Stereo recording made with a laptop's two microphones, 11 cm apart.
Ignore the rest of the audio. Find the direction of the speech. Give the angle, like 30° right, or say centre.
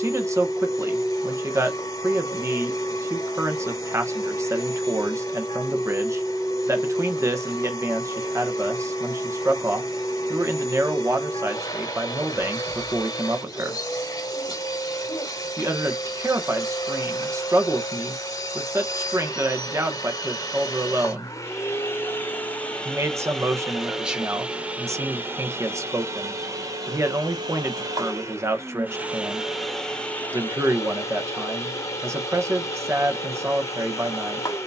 20° right.